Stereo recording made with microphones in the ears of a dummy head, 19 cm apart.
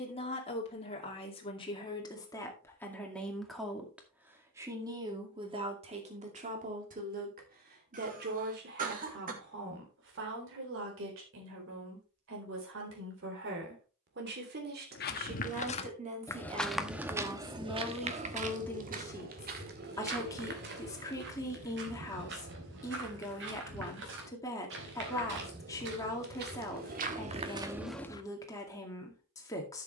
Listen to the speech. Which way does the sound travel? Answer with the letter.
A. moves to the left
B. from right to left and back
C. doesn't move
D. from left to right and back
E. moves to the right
D.